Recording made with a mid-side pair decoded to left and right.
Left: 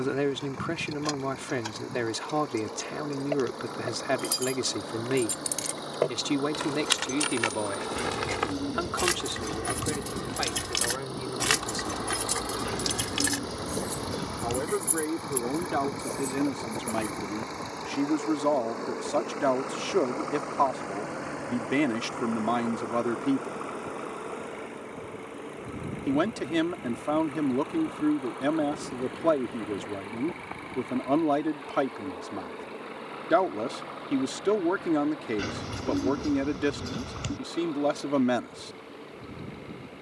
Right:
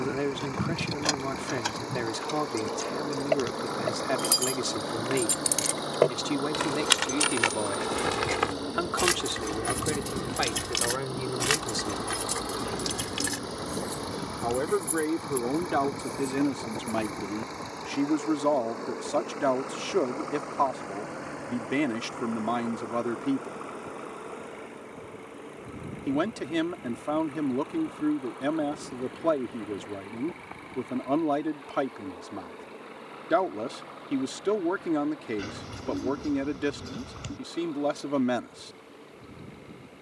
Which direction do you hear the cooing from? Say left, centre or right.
left.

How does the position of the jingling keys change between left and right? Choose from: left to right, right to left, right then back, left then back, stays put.
right to left.